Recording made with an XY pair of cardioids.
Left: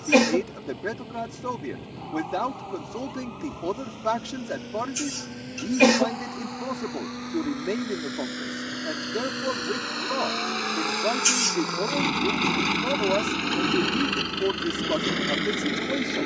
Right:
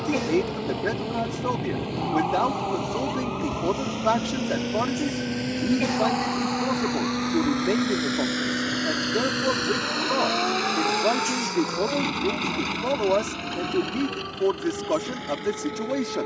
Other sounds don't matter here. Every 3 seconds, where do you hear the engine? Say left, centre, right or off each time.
right, right, right, centre, left, left.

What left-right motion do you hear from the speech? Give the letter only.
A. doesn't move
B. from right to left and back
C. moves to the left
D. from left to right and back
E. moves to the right
A.